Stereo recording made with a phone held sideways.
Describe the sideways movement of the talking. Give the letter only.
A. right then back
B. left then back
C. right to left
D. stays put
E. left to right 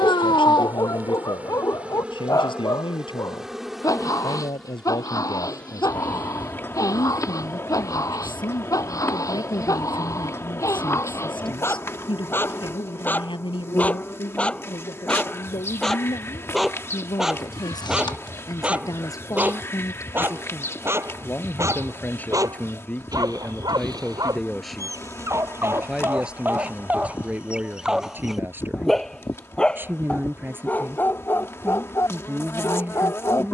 E.